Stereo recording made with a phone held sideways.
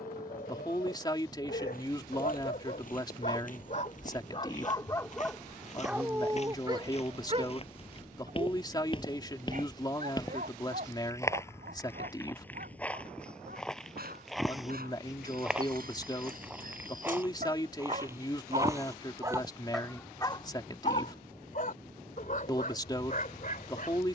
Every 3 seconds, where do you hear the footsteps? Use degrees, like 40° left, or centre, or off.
60° left, 50° left, 40° left, 20° left, 10° left, 10° right, 20° right, off.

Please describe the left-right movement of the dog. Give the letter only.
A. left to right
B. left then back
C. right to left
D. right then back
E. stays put
D.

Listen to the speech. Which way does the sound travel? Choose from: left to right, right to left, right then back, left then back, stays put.
stays put.